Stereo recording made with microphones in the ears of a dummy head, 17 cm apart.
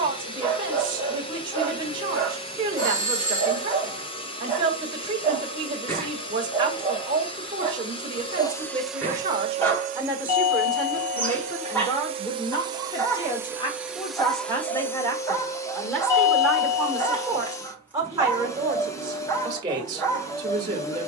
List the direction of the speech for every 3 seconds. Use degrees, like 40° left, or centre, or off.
20° right, 20° right, 20° right, centre, 20° left, centre, 20° right.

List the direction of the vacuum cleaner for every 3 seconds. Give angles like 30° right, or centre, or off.
30° left, 30° left, 20° left, 40° right, 10° right, 20° left, 20° left.